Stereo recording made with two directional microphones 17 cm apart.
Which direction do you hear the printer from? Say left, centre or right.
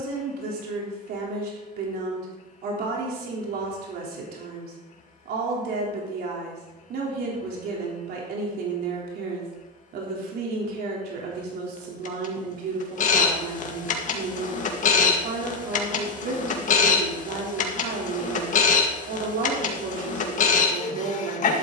left.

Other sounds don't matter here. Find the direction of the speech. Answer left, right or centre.
right.